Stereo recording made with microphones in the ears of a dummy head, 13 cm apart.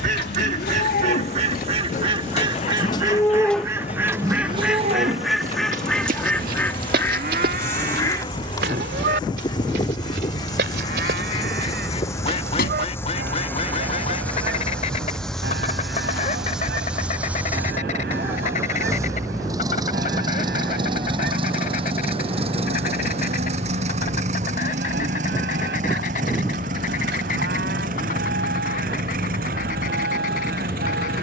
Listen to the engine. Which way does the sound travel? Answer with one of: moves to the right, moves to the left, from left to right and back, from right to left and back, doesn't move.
moves to the right.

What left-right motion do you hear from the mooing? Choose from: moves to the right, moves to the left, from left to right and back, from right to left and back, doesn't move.
moves to the right.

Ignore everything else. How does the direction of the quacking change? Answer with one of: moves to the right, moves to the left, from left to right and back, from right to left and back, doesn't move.
moves to the left.